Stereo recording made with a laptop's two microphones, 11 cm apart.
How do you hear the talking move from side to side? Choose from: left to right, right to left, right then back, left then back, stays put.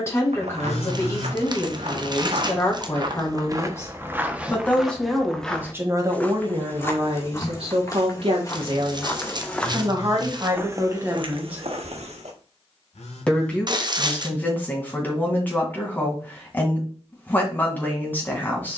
right then back.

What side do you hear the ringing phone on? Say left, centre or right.
left.